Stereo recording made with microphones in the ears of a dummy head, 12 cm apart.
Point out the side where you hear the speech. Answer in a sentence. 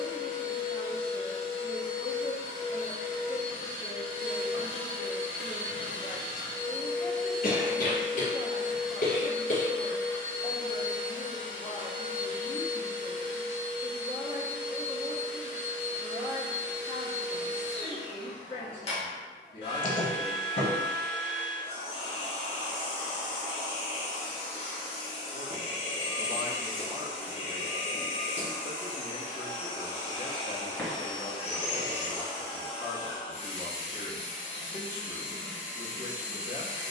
In this clip you hear the speech on the left.